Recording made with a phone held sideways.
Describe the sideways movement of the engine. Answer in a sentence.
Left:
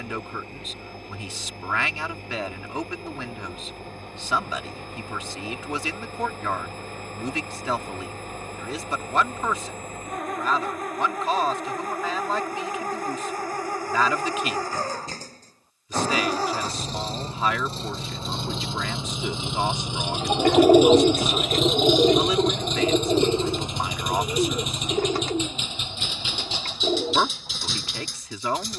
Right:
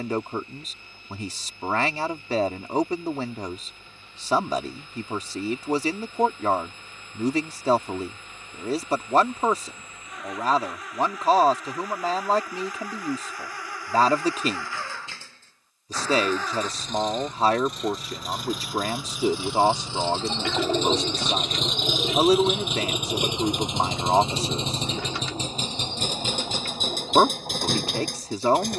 In this clip you hear the engine move from left to right.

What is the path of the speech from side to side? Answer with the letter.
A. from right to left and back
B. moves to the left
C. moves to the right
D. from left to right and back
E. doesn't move
E.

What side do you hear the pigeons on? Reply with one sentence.
You can hear the pigeons on the left.